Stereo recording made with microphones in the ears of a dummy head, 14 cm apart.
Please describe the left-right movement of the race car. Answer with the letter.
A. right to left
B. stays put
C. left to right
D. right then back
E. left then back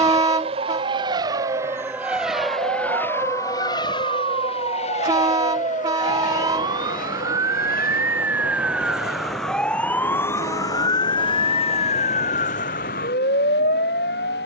A.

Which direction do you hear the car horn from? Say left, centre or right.
right.